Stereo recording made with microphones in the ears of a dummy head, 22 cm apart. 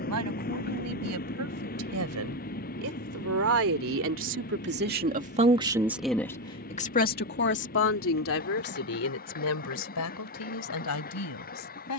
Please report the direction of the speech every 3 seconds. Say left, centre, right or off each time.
right, right, left, left.